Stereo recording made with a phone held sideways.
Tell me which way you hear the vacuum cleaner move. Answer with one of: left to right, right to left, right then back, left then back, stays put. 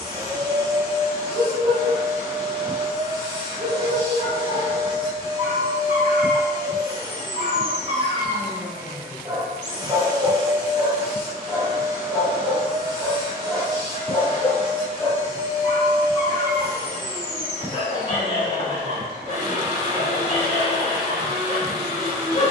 stays put.